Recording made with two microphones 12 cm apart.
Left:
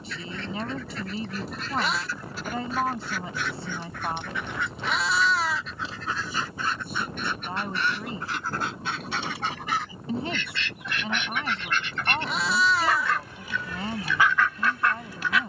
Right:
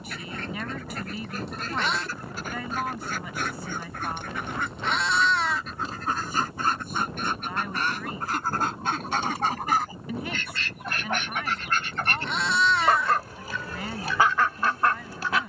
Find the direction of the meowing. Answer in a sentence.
In this clip you hear the meowing in the centre.